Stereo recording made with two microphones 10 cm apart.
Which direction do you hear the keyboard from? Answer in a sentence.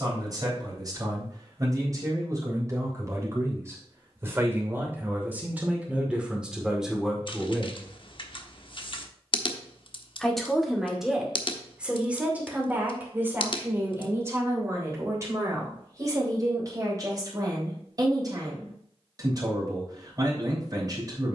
In this clip you hear the keyboard on the left.